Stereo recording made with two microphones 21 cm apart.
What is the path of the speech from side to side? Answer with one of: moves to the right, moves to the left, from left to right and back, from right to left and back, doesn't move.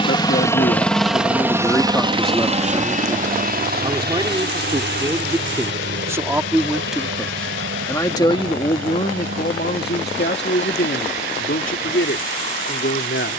from left to right and back.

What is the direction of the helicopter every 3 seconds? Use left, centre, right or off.
centre, right, right, right, right.